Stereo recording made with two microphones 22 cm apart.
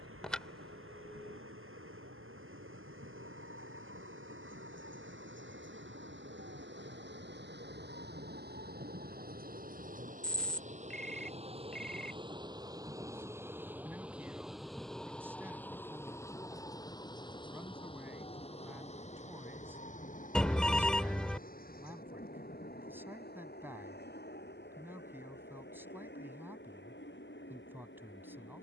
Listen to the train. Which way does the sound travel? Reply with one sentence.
You can hear the train travel towards the left.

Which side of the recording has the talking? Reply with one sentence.
In this clip you hear the talking in the centre.